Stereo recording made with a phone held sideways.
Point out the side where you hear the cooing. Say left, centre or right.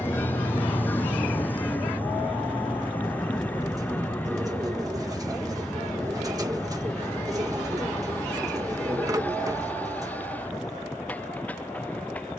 right.